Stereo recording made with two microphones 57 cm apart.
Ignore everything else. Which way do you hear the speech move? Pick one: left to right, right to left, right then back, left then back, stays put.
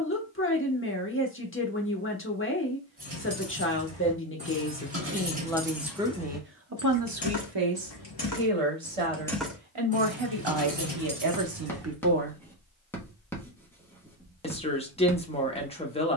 right then back.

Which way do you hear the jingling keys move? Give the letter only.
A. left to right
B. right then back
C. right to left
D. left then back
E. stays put
D.